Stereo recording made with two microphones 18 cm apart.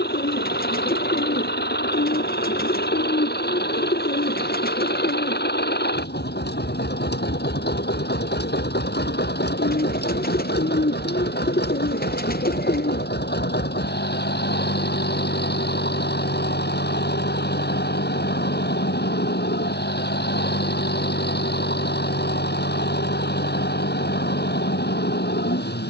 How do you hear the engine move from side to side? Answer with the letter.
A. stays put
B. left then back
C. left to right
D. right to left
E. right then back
A.